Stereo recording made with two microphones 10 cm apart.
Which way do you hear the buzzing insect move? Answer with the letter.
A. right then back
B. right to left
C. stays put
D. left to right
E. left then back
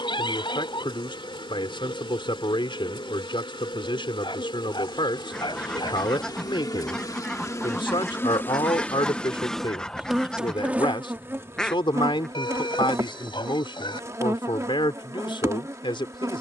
D.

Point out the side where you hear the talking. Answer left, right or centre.
left.